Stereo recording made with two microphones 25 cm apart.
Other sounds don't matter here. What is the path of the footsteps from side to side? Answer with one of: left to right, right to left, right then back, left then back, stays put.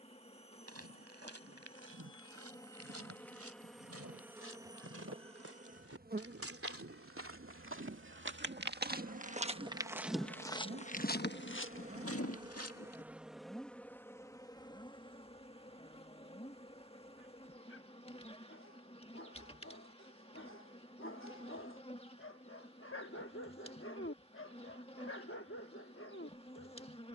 right to left.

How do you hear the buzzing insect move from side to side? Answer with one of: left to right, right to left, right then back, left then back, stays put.
right then back.